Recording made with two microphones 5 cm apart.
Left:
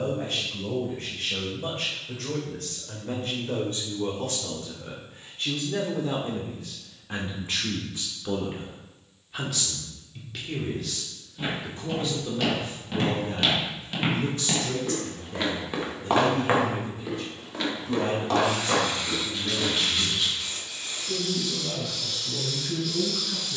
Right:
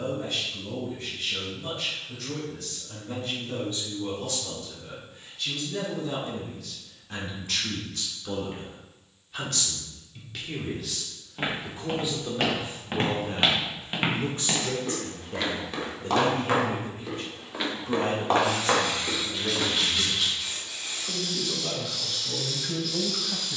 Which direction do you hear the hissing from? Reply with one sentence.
You can hear the hissing in the centre.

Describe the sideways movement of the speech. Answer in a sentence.
In this clip you hear the speech move to the right.